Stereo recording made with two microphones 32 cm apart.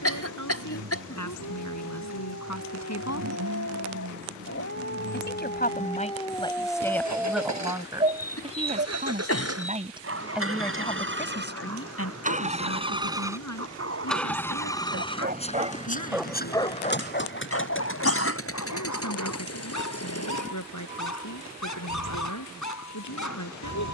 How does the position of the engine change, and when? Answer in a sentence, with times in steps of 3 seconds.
You can hear the engine on the right from 0 s, in the centre from 12 s and on the left from 15 s.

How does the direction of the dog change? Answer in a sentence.
In this clip you hear the dog go right and come back.